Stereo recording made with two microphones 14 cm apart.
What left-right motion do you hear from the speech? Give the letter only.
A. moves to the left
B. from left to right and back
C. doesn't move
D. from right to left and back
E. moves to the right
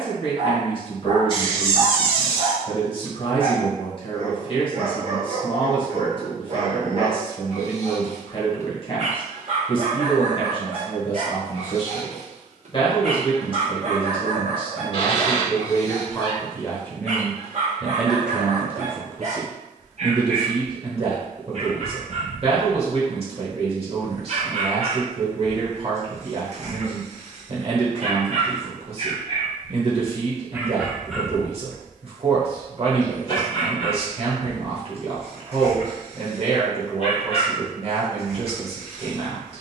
E.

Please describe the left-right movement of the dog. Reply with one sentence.
You can hear the dog move to the left.